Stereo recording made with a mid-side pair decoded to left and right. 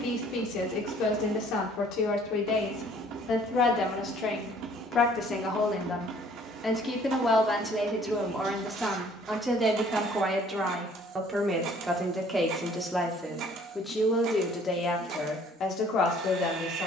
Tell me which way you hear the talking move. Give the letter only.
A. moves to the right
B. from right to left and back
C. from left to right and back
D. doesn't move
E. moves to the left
C.